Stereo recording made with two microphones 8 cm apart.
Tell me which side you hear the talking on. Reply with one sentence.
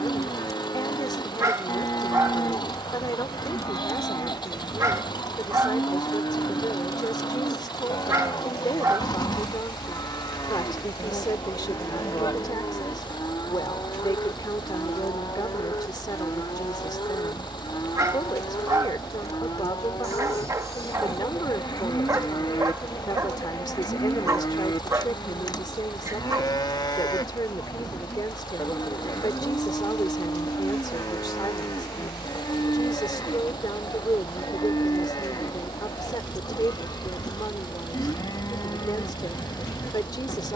In this clip you hear the talking on the left.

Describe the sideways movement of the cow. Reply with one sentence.
In this clip you hear the cow stay put.